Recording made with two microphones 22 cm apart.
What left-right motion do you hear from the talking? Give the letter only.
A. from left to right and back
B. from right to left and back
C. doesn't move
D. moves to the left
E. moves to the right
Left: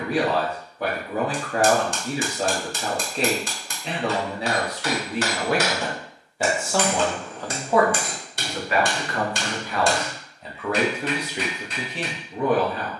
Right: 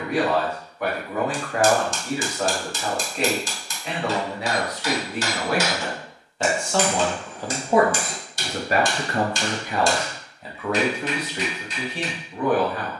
A.